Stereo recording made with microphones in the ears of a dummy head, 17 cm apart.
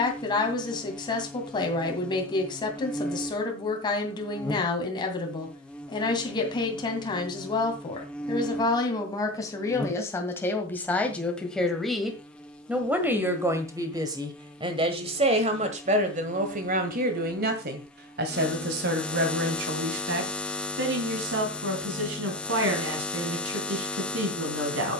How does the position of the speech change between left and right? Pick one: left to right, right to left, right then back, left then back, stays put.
left to right.